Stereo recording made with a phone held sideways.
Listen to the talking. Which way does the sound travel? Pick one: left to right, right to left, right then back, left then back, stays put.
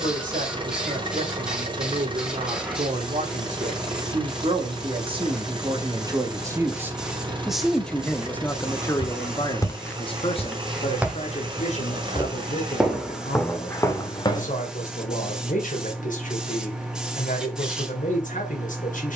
right to left.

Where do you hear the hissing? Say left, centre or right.
centre.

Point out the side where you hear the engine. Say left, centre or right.
right.